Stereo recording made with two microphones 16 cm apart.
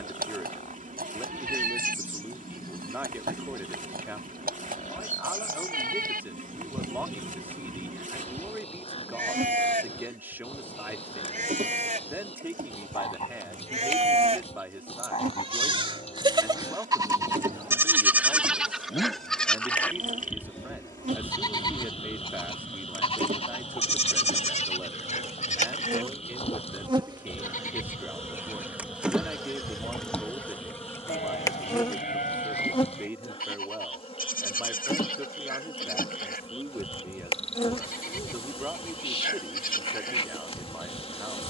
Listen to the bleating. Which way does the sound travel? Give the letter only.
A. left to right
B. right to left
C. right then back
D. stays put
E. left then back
B.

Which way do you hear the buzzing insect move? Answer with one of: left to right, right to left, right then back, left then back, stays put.
right to left.